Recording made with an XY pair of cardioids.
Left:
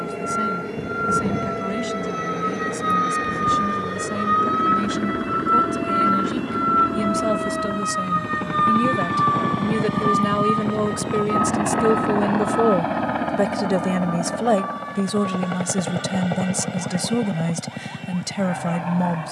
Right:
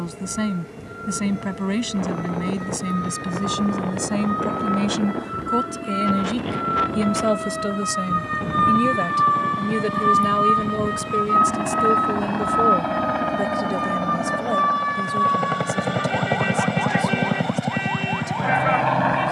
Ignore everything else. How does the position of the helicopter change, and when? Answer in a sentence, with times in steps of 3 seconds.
In this clip you hear the helicopter on the left from 0 s, in the centre from 12 s and on the right from 15 s.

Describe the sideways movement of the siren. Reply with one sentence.
In this clip you hear the siren travel towards the right.